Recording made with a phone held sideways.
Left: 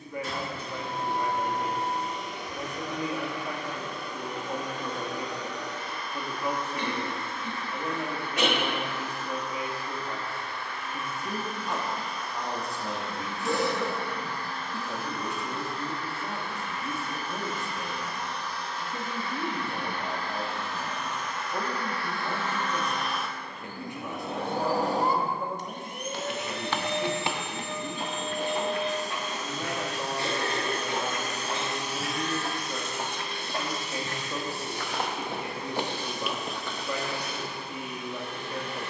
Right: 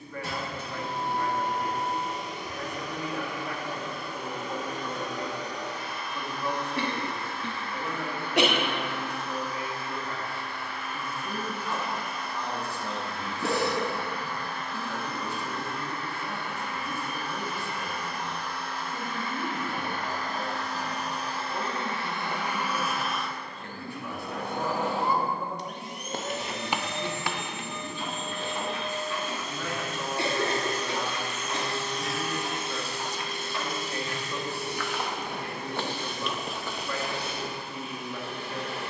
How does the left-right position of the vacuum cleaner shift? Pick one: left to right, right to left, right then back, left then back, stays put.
left then back.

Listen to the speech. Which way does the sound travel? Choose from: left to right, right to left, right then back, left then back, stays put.
stays put.